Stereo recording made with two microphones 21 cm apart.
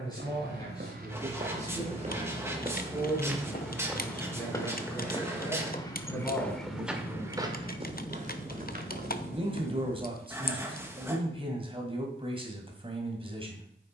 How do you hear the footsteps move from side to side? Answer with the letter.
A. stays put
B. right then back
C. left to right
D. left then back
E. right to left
D.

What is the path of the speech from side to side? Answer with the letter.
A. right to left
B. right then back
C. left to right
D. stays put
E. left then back
C.